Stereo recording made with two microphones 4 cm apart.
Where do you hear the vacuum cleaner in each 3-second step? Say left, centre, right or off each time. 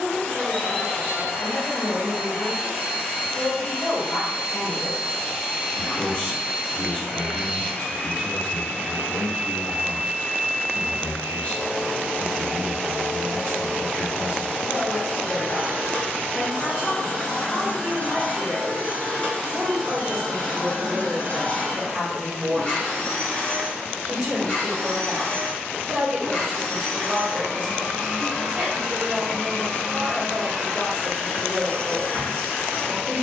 left, left, left, centre, centre, left, left, left, left, left, left.